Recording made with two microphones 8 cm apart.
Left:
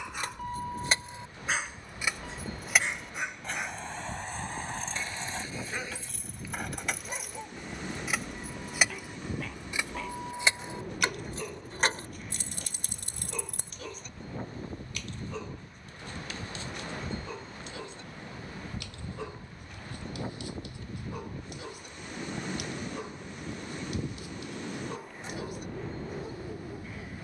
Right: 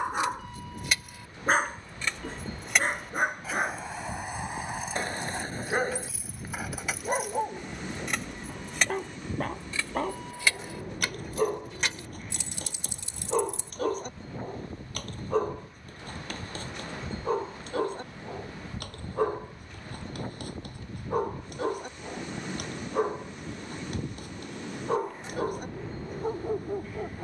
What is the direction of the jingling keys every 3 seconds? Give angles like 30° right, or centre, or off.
20° left, 10° right, centre, 20° left, 50° left, off, off, off, off.